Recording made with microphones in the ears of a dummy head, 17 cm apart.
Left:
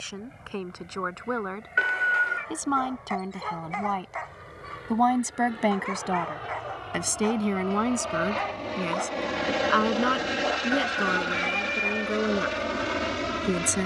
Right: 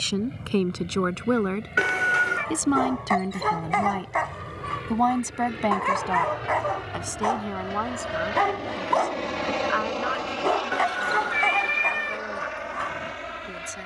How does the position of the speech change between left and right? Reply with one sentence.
You can hear the speech move from right to left.